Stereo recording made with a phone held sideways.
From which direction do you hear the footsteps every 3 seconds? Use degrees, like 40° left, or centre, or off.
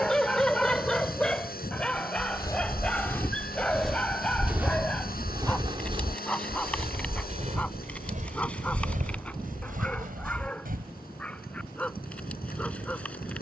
20° left, 10° right, 50° right, 70° right, off.